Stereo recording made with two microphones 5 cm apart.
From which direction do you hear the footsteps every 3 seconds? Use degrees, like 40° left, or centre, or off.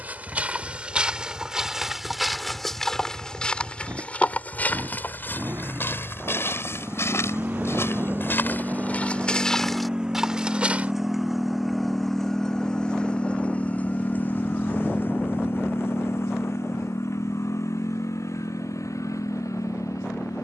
10° right, 30° left, 50° left, centre, off, off, off.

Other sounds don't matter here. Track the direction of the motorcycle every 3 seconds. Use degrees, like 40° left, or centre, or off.
50° right, 50° right, 30° right, 10° right, 20° left, 50° left, 70° left.